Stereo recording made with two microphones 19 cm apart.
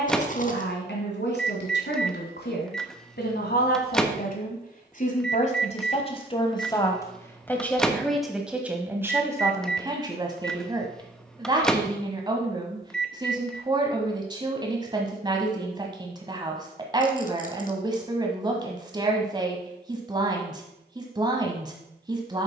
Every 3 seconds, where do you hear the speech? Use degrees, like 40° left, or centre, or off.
70° left, 50° left, 10° left, 20° right, 20° right, 20° right, 20° right, 20° right.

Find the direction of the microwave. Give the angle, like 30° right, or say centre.
centre.